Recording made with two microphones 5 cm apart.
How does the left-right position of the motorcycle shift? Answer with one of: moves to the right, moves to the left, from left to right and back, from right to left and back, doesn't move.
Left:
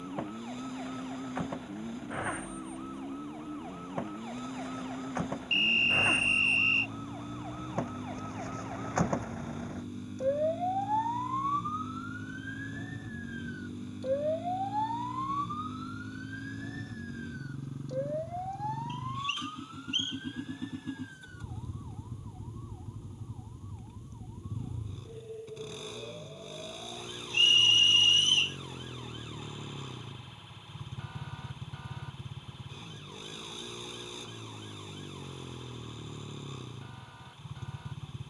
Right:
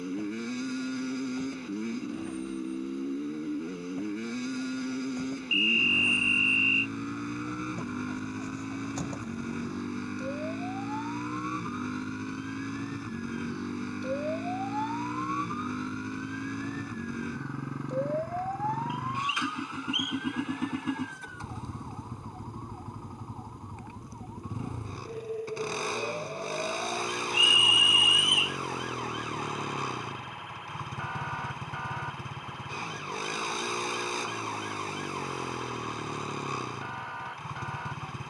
doesn't move.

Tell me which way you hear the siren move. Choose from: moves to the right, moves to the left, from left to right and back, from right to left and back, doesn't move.
moves to the right.